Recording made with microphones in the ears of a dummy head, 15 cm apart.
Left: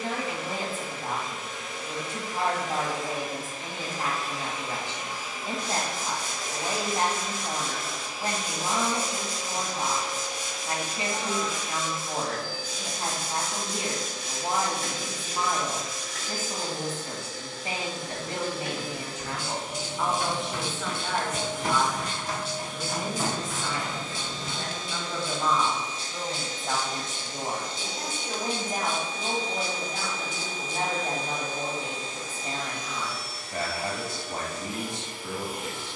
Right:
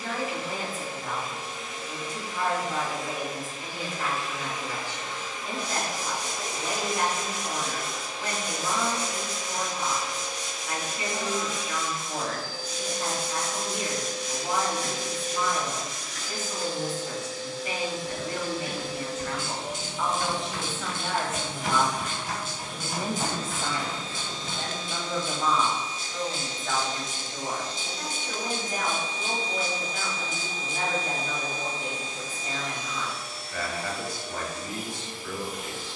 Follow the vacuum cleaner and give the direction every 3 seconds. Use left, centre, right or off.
left, left, centre, left, left, left, left, left, left, left, left, left.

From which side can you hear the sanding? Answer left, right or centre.
left.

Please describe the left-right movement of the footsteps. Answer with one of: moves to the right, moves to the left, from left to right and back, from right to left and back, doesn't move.
moves to the left.